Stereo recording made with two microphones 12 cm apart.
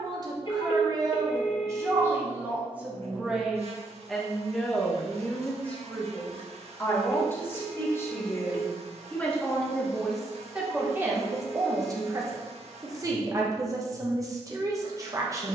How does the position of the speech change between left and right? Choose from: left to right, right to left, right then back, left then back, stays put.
left then back.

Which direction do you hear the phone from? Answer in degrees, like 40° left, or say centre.
50° left.